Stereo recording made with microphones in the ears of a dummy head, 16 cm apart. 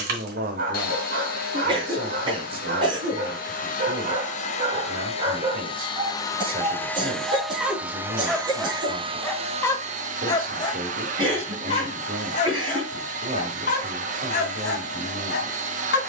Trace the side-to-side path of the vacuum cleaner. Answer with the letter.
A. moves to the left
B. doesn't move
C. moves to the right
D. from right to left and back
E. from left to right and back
C.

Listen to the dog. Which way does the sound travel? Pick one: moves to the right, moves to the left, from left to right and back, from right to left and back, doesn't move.
moves to the left.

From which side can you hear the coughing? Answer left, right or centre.
right.